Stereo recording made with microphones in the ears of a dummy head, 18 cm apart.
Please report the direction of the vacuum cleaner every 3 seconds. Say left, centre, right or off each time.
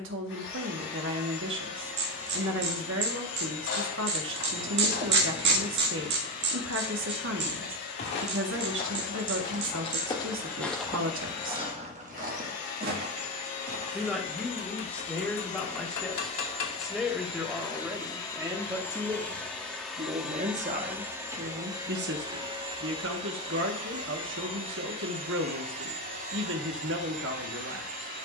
left, left, left, left, left, left, centre, right, right, right.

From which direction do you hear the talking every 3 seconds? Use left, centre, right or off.
right, right, right, right, centre, centre, right, right, right, right.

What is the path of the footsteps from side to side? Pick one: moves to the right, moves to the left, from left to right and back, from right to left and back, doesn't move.
moves to the right.